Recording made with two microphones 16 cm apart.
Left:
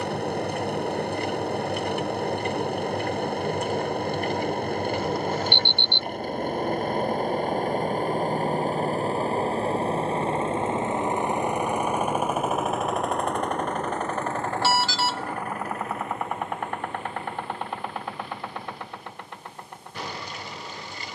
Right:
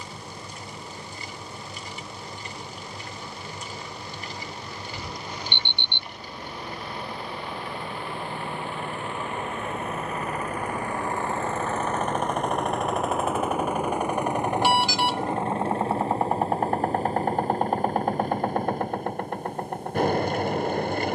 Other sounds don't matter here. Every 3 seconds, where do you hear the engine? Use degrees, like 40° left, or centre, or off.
70° left, 60° left, 50° left, 30° left, 10° right, 30° right, 50° right.